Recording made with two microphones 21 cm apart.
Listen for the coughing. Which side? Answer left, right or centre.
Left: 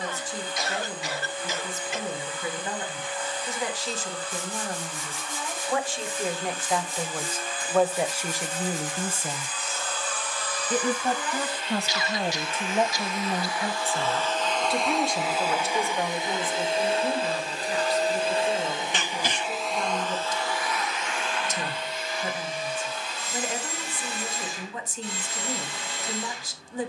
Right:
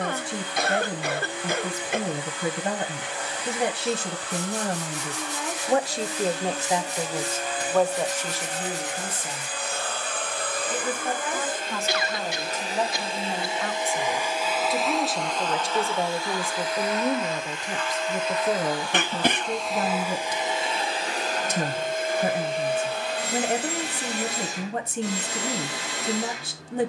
right.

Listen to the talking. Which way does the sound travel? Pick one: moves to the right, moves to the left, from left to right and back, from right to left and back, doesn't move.
from right to left and back.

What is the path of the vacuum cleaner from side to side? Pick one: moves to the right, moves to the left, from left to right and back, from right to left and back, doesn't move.
from right to left and back.